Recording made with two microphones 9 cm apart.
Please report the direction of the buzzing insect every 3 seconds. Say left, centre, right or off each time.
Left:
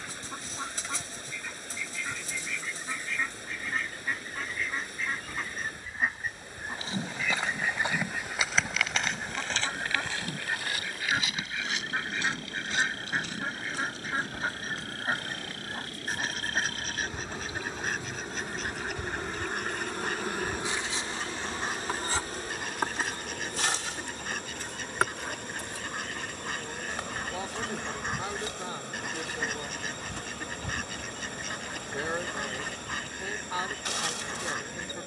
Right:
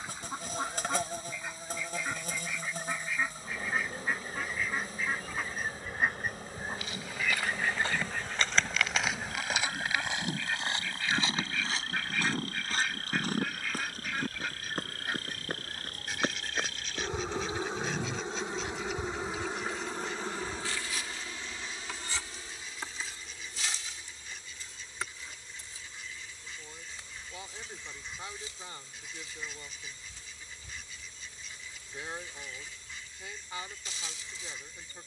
right, right, right, right, right, right, centre, left, left, left, left, left.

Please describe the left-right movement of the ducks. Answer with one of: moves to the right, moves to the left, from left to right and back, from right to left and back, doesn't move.
moves to the left.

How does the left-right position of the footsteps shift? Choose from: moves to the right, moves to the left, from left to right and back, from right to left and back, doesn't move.
moves to the right.